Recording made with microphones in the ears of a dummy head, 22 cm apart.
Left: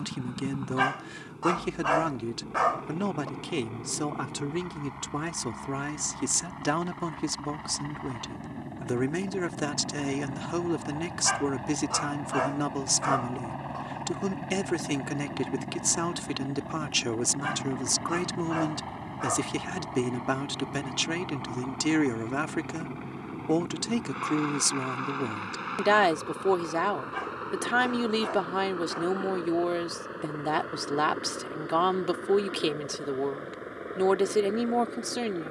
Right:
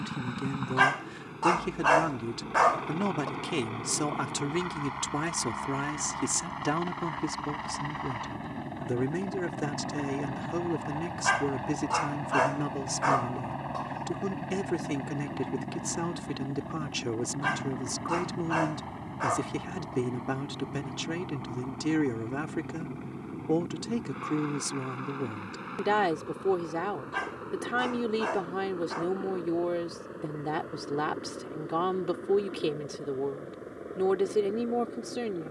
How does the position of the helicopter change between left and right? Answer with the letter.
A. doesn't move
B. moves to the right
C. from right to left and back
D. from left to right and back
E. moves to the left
E.